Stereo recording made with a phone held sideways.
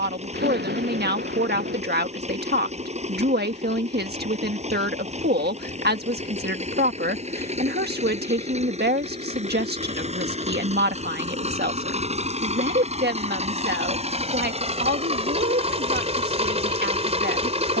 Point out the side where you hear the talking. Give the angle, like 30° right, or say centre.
70° right.